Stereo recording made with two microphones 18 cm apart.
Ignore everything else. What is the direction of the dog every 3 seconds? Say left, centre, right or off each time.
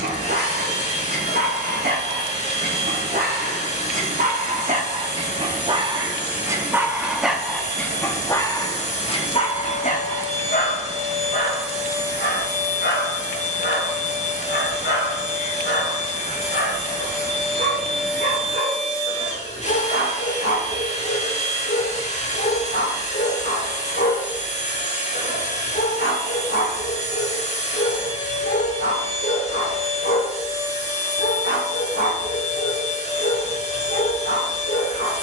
right, right, centre, left, left, left, left, left, left, left, left, left.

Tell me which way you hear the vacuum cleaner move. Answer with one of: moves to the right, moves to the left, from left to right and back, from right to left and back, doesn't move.
doesn't move.